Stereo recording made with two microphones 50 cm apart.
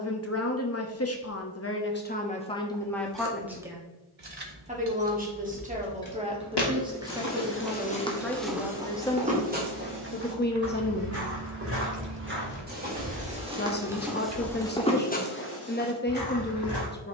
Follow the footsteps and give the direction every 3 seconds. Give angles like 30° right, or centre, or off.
off, off, 20° left, 20° right, 10° right, 40° left.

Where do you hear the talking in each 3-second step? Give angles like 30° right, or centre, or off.
20° left, 10° right, centre, 20° left, 20° left, 20° left.